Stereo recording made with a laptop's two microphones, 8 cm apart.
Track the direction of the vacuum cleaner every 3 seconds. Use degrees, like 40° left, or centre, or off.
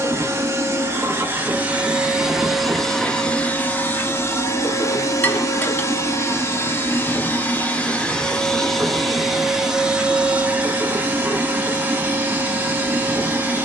20° right, 30° left, 20° left, 20° right, 20° right.